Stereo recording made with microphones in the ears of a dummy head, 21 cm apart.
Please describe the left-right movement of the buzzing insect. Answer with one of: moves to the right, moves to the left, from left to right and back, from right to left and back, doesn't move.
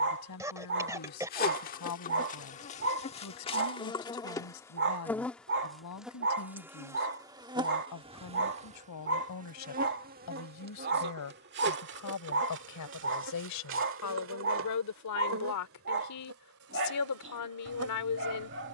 moves to the right.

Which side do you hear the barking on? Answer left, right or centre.
right.